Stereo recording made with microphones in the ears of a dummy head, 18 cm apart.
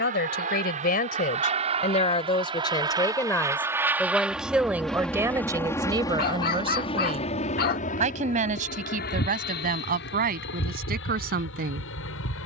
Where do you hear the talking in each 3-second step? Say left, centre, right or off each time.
left, centre, right, right.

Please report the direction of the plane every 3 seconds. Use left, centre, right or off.
right, centre, left, left.